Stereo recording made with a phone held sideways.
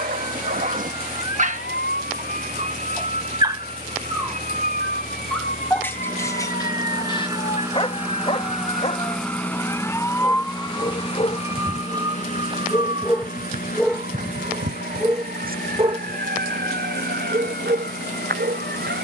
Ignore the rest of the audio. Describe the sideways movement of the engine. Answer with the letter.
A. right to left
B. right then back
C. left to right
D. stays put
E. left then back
A.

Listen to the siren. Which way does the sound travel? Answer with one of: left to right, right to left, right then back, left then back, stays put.
left to right.